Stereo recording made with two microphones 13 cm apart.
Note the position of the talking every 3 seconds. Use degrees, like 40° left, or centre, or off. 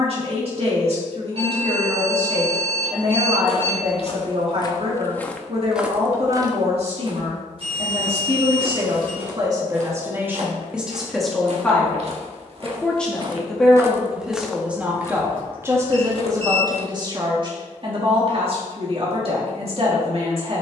50° right, 50° right, 50° right, 10° right, centre, 30° right, 50° right.